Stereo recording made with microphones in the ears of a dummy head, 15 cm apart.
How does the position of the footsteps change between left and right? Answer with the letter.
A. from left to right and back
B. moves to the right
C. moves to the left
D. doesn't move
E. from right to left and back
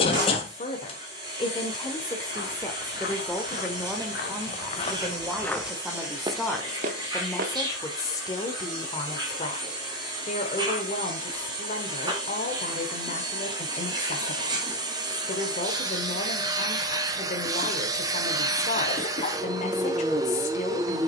B.